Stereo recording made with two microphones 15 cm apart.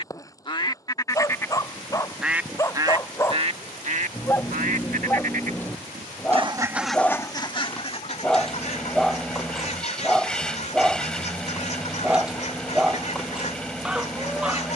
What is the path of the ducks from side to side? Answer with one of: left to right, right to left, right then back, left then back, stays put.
right then back.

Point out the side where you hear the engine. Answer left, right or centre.
centre.